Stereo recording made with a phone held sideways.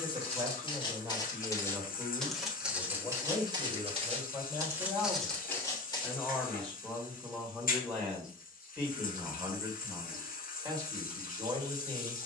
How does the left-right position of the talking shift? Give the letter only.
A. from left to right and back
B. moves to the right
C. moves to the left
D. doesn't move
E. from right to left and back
E.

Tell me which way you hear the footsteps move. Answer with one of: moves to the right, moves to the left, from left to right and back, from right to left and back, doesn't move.
from left to right and back.